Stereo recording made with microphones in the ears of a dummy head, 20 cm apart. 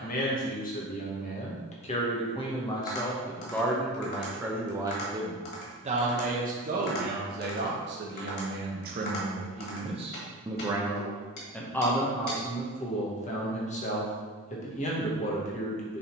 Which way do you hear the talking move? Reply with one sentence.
In this clip you hear the talking go right and come back.